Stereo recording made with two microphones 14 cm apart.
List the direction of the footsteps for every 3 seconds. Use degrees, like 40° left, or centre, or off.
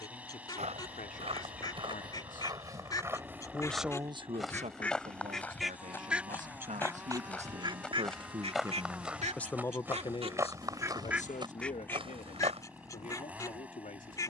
40° right, centre, 10° left, 20° right, 40° right.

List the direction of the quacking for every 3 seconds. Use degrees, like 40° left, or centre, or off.
30° left, 10° left, 30° right, 30° right, 20° left.